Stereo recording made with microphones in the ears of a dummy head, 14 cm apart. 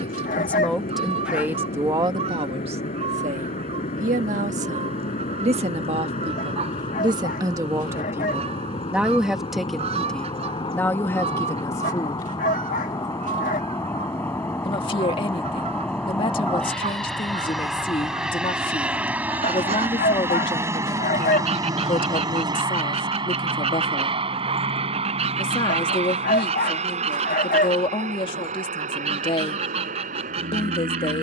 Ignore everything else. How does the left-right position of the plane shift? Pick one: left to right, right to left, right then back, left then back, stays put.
left to right.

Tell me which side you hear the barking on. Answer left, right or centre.
left.